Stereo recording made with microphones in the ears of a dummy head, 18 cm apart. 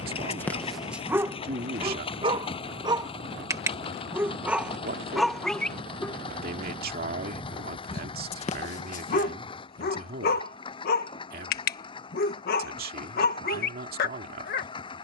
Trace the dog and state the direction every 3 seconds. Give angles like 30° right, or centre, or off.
10° right, 10° right, 30° left, 40° left, 50° left.